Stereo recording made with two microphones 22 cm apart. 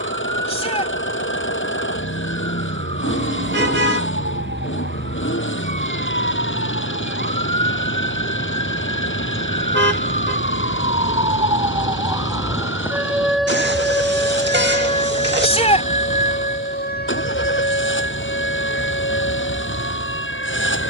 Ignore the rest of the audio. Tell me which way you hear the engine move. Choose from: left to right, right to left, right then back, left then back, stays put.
stays put.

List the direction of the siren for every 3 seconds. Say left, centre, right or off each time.
right, right, right, right, centre, left, left.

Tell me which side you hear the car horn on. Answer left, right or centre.
right.